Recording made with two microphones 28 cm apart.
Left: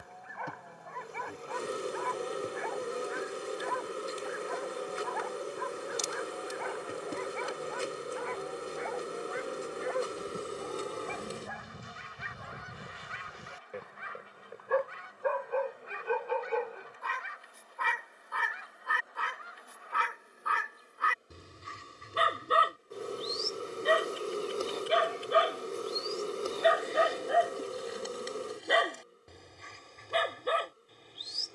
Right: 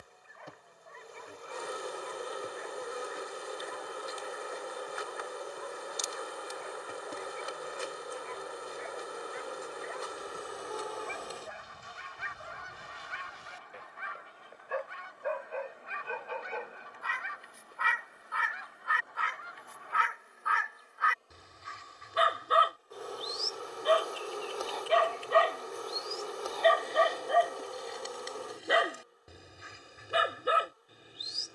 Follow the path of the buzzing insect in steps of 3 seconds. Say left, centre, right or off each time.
left, left, left, left, centre, centre, centre, left, left, left, left.